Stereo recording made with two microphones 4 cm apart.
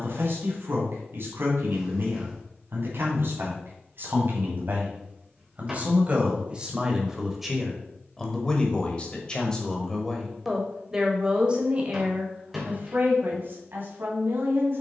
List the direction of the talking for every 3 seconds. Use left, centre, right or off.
right, right, centre, centre, right.